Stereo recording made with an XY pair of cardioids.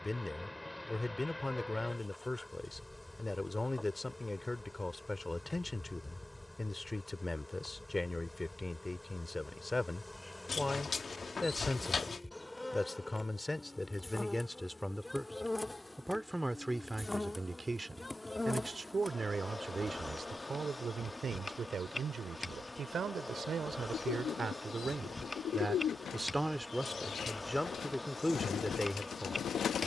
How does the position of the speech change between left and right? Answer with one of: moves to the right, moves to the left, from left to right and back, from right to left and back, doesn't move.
from left to right and back.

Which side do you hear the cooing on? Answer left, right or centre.
left.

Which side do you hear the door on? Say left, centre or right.
left.